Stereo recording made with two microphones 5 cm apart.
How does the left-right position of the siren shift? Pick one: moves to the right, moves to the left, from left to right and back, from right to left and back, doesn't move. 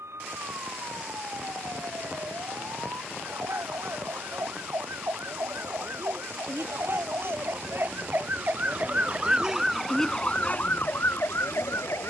moves to the left.